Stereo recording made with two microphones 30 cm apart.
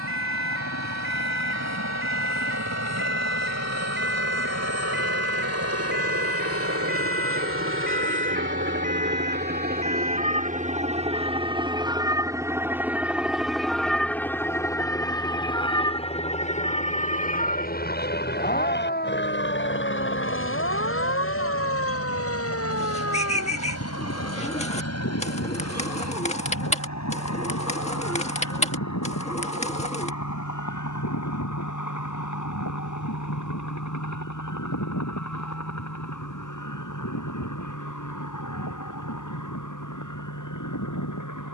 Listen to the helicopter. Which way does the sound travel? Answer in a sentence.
In this clip you hear the helicopter move to the left.